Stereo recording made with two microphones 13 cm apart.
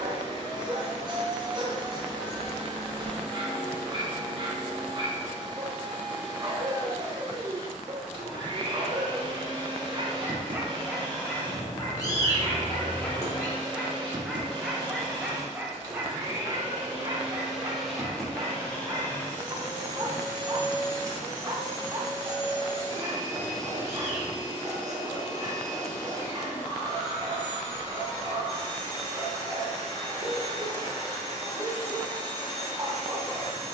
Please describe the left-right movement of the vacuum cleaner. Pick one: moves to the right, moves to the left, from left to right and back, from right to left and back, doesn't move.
moves to the left.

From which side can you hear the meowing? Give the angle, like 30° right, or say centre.
30° left.